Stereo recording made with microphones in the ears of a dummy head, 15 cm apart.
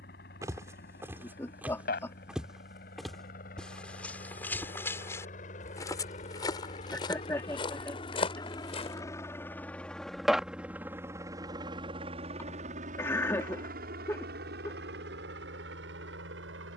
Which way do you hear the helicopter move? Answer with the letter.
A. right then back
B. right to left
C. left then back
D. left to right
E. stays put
D.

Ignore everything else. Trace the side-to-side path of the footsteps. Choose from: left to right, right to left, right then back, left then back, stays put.
right to left.